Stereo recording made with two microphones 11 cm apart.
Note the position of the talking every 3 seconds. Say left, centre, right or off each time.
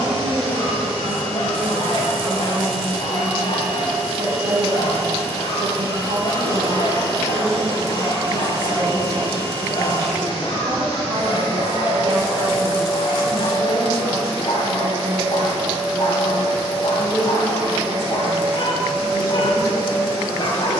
right, right, right, right, right, centre, left.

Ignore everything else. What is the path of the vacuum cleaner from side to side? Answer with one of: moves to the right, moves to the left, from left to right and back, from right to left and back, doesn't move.
doesn't move.